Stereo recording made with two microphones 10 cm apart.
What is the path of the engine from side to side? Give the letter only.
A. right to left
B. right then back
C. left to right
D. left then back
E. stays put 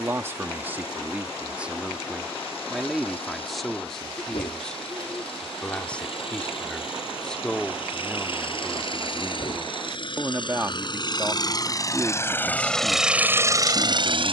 C.